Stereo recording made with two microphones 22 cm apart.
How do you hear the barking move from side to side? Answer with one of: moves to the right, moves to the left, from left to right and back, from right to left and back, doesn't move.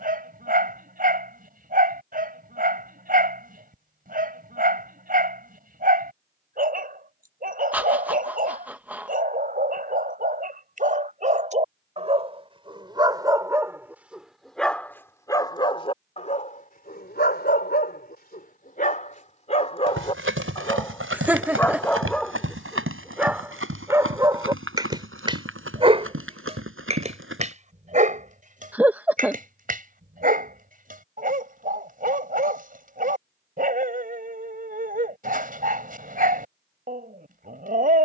from right to left and back.